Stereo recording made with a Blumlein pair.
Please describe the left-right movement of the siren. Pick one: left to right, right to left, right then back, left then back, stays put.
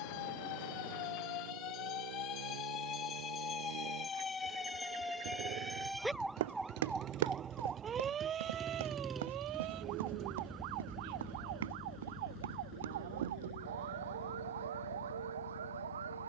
left to right.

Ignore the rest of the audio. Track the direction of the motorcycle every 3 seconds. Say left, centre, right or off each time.
right, right, right, centre, left, left.